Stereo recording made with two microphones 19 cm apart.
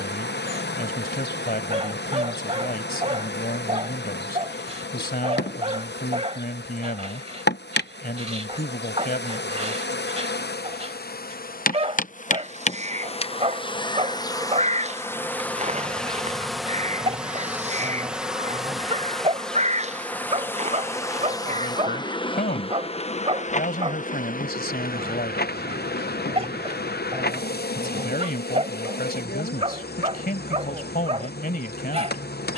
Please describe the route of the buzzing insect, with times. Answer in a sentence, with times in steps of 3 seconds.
In this clip you hear the buzzing insect on the left from 0 s, in the centre from 15 s and on the left from 21 s.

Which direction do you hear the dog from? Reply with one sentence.
You can hear the dog on the right.